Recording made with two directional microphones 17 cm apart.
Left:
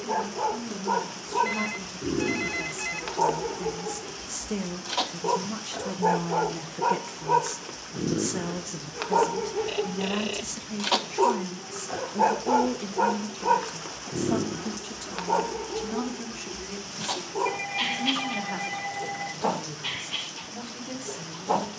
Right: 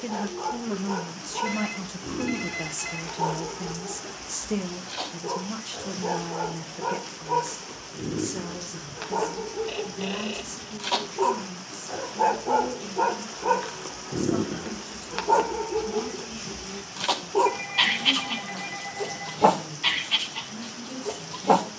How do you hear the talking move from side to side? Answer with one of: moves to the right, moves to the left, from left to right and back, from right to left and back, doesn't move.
moves to the left.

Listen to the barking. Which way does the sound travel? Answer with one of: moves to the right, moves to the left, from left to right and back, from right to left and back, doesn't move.
moves to the right.